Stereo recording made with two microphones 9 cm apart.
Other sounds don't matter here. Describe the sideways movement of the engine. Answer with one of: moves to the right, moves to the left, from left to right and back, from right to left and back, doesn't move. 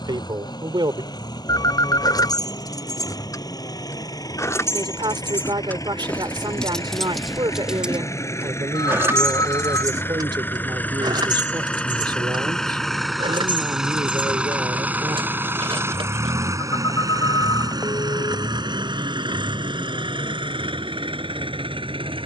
moves to the right.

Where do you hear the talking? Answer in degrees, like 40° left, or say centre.
60° right.